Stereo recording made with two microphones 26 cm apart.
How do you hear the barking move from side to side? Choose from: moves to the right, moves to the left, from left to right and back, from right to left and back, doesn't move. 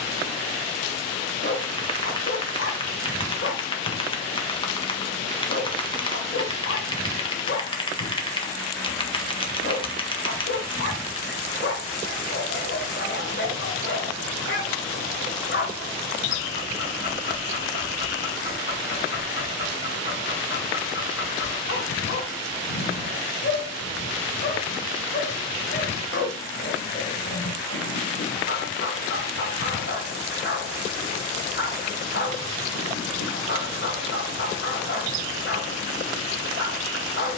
doesn't move.